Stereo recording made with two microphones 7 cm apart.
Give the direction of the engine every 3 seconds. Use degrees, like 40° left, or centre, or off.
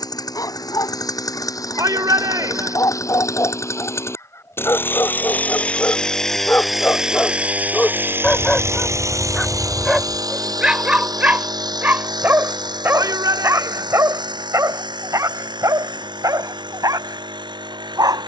50° left, 30° left, 20° right, 60° right, 70° right, 80° right.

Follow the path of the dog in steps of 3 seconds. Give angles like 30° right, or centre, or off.
50° left, 40° left, 20° left, 10° right, 40° right, 50° right.